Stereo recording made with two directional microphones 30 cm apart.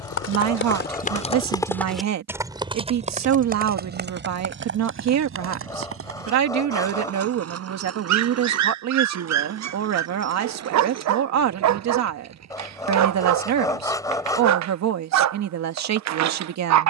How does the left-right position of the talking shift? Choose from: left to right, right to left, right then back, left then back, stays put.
stays put.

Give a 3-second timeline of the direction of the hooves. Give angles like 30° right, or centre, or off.
20° left, 40° right, 50° right, 60° right, 60° right, off.